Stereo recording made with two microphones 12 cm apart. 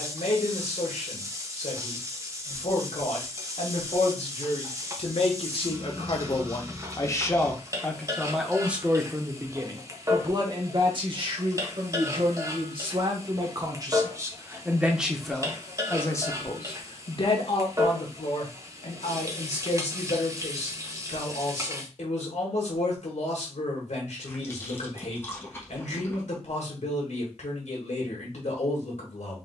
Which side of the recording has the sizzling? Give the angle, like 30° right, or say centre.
30° right.